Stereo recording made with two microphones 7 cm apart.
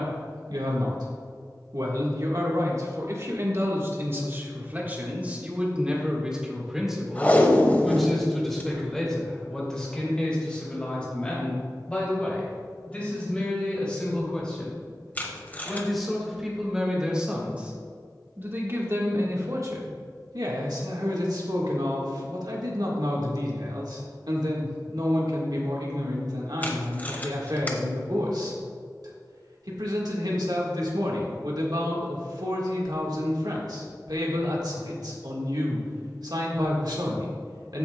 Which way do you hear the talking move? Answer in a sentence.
You can hear the talking move from right to left and back again.